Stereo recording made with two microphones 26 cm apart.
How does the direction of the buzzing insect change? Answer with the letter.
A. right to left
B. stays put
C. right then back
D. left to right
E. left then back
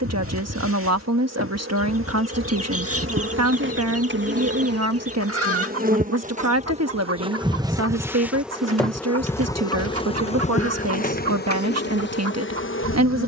A.